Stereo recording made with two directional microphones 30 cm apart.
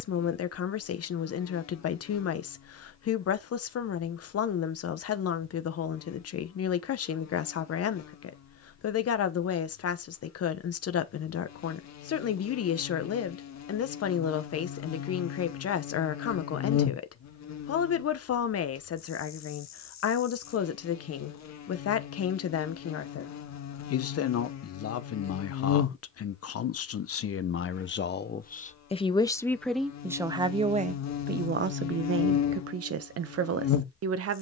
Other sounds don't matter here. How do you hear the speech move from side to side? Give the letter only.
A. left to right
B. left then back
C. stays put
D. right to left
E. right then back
A.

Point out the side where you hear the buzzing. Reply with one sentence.
In this clip you hear the buzzing on the left.